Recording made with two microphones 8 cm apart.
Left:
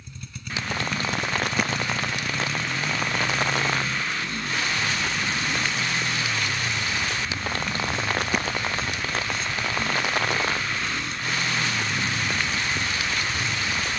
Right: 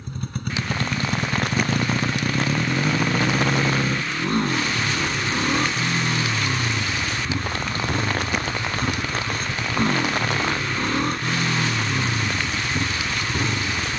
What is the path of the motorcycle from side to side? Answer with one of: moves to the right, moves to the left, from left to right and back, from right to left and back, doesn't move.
doesn't move.